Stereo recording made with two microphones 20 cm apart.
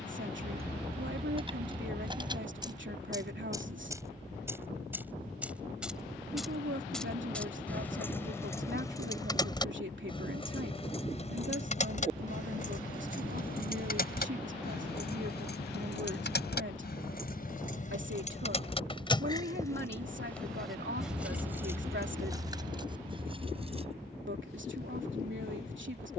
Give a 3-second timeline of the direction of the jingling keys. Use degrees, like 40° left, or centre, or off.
20° right, 10° right, 10° left, 30° left, 50° left, 50° left, 20° left, 20° right, off.